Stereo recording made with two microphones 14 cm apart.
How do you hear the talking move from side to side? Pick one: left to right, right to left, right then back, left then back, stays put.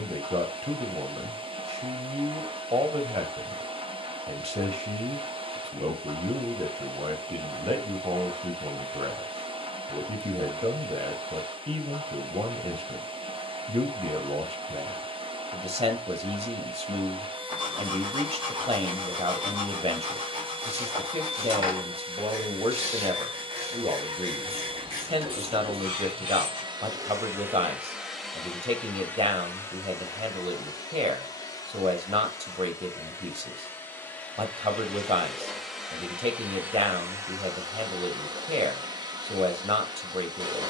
stays put.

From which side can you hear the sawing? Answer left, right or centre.
right.